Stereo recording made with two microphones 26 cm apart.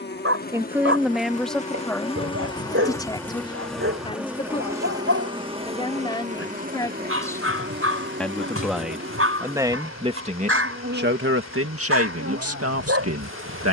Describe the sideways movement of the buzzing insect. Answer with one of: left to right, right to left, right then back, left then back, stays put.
left to right.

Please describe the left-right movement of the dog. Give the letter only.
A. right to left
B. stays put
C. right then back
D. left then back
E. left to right
B.